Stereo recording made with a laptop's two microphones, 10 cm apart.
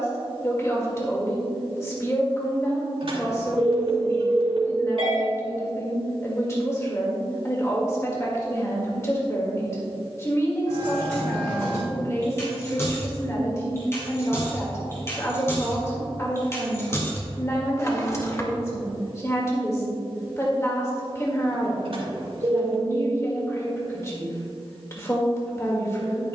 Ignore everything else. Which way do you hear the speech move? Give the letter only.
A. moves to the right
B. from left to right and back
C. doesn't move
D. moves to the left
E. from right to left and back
C.